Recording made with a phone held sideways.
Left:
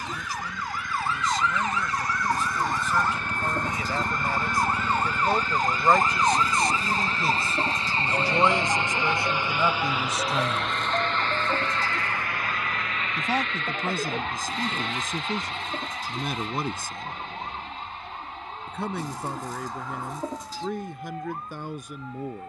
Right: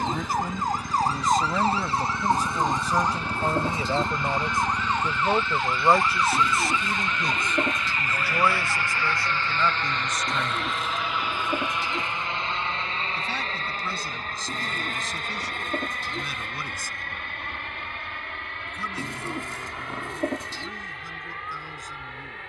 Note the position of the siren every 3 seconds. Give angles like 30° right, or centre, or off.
30° right, centre, 30° left, 40° left, 50° left, 60° left, 60° left, 60° left.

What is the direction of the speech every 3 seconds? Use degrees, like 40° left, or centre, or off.
50° right, 20° right, 10° left, 30° left, 50° left, 60° left, 60° left, 70° left.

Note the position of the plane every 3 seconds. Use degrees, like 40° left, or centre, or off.
70° left, 60° left, 40° left, centre, 30° right, 50° right, 60° right, 70° right.